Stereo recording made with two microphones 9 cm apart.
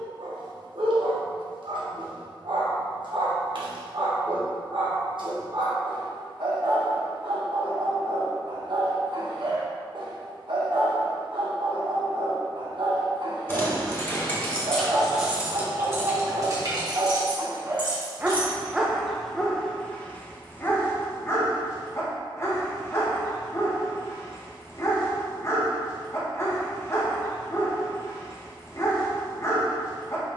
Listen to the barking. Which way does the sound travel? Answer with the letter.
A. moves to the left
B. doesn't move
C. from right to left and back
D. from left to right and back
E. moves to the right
A.